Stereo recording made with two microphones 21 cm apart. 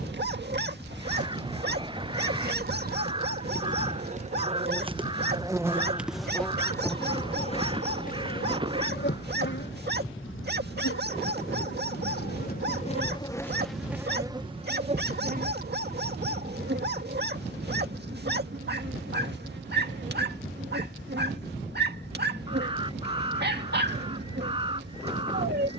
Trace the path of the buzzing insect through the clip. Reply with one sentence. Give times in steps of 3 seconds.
You can hear the buzzing insect on the right from 0 s, on the left from 6 s, in the centre from 12 s and on the right from 15 s.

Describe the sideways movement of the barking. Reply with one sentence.
In this clip you hear the barking stay put.